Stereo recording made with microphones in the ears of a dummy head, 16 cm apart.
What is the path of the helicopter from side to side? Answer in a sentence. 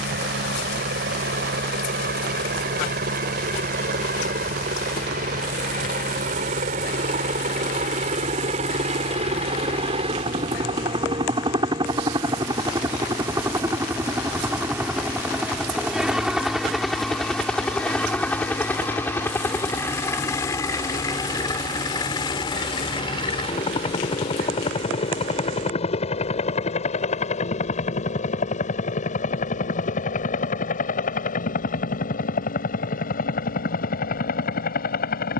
In this clip you hear the helicopter move to the left.